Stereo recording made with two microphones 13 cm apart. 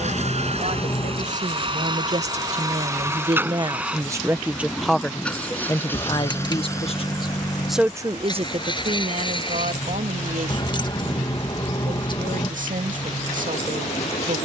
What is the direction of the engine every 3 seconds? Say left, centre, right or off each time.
right, centre, left, left, left.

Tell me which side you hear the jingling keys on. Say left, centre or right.
left.